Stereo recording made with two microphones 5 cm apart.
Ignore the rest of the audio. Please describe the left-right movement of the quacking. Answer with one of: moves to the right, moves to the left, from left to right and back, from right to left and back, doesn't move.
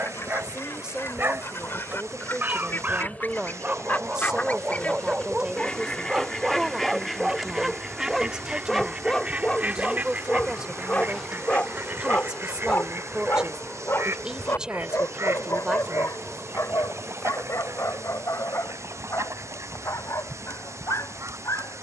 moves to the right.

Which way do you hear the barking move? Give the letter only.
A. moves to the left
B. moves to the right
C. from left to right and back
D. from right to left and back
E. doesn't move
A.